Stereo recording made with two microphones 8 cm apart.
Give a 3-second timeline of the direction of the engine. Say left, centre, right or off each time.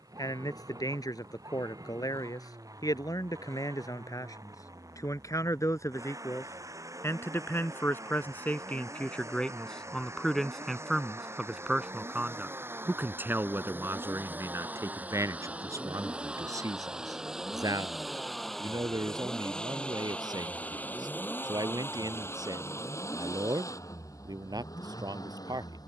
right, right, right, right, right, centre, centre, left, left.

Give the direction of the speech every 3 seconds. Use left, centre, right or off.
left, left, left, centre, right, right, right, right, right.